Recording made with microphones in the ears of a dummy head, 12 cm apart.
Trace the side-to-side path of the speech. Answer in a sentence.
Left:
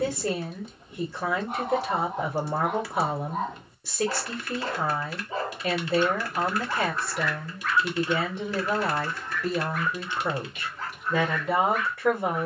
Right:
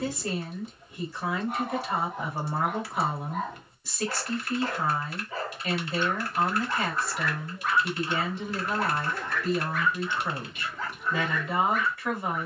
In this clip you hear the speech stay in one place.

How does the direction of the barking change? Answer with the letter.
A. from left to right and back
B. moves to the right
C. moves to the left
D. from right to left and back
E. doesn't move
B.